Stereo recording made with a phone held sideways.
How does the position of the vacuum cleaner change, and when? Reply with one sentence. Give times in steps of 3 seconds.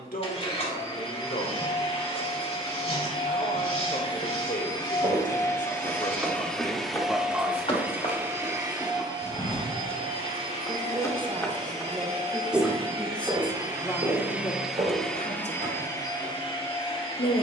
You can hear the vacuum cleaner on the left from 0 s, in the centre from 6 s, on the right from 9 s and on the left from 15 s.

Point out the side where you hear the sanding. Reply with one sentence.
You can hear the sanding on the left.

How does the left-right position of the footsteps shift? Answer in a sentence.
You can hear the footsteps move from right to left and back again.